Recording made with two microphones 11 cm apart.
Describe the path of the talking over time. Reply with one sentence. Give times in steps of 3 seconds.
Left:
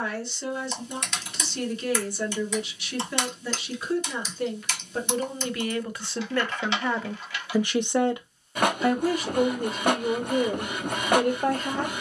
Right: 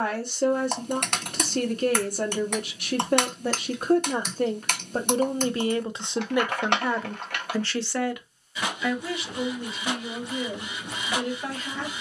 In this clip you hear the talking on the right from 0 s, in the centre from 6 s and on the left from 9 s.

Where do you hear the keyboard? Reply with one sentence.
In this clip you hear the keyboard on the right.